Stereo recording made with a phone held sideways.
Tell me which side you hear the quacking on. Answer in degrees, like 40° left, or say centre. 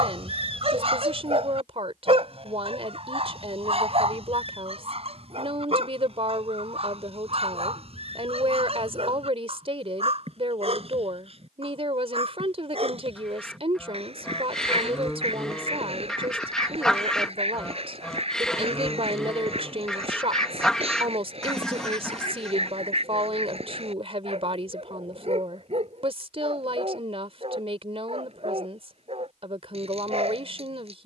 10° left.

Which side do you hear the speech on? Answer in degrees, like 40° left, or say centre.
50° right.